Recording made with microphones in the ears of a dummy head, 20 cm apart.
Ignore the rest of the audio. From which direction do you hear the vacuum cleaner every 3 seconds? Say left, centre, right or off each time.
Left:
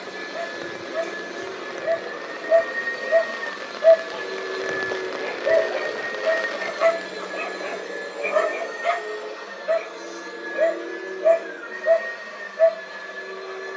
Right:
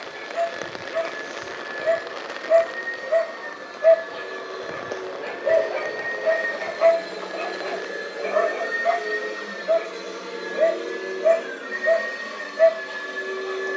left, left, centre, right, right.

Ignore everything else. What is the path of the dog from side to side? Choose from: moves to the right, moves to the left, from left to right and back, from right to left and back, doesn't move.
from right to left and back.